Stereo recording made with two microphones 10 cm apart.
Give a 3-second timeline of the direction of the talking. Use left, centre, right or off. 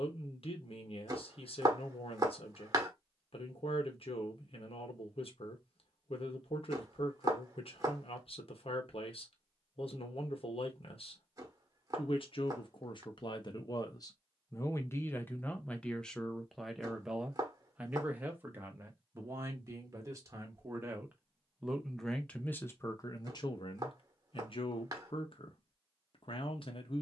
left, left, left, left, left, centre, right, left, left.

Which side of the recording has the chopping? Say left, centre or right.
right.